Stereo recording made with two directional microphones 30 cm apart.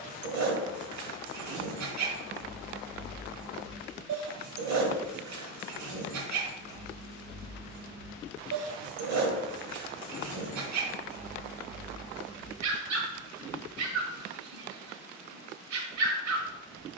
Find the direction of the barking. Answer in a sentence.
In this clip you hear the barking on the right.